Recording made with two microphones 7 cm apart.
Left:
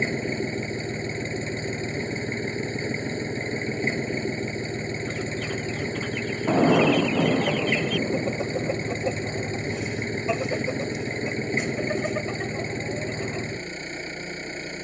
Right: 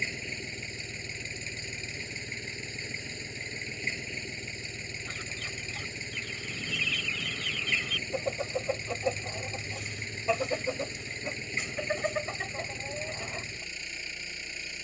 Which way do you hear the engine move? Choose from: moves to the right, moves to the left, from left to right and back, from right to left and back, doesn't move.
doesn't move.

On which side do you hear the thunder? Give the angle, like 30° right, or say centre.
80° left.